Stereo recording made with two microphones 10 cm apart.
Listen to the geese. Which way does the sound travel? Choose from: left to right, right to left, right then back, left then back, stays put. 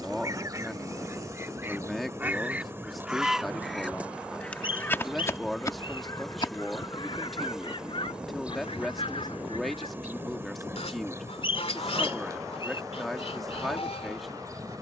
right to left.